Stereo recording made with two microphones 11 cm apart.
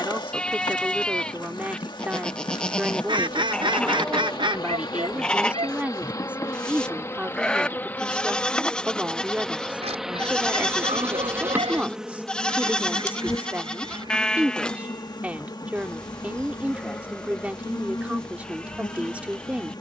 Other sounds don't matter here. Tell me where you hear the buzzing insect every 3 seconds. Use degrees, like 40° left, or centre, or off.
40° left, 40° left, 20° left, 10° right, 30° left, 40° left, 40° left.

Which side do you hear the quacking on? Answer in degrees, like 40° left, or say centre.
50° right.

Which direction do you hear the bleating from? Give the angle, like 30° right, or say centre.
10° left.